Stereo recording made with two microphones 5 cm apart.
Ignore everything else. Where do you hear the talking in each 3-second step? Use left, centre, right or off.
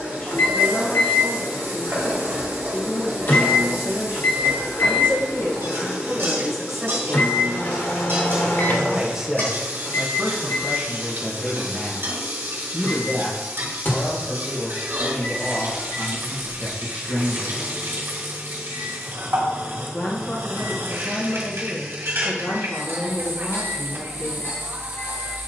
left, left, centre, centre, left, left, left, left, left.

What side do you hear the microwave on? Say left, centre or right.
left.